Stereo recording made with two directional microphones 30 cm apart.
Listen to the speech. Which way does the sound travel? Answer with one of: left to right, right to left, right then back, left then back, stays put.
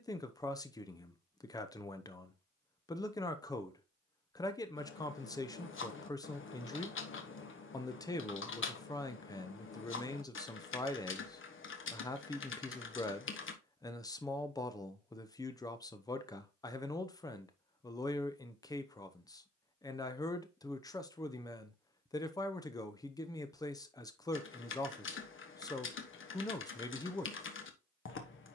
stays put.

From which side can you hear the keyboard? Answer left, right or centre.
left.